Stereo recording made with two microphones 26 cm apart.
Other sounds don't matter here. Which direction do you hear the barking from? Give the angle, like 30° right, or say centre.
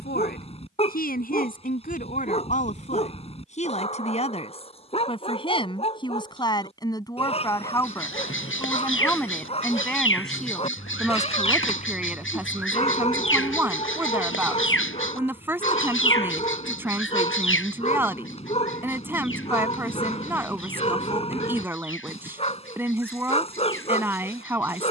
20° left.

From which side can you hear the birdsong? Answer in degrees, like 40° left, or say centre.
50° left.